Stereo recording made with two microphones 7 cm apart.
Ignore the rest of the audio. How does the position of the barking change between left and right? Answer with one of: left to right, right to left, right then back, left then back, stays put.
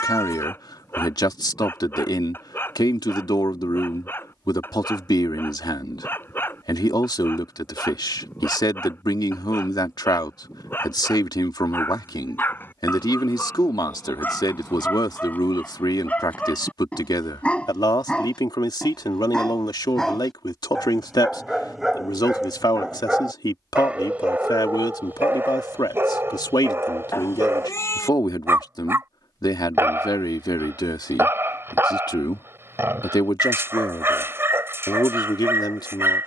left to right.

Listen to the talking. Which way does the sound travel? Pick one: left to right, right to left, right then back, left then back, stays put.
stays put.